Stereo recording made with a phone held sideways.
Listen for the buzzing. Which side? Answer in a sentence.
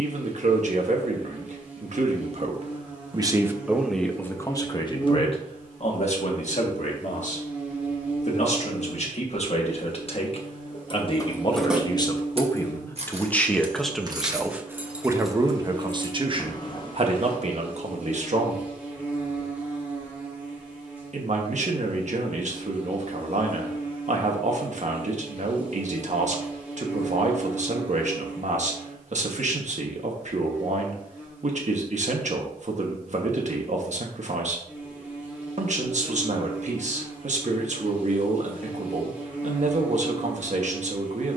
In this clip you hear the buzzing in the centre.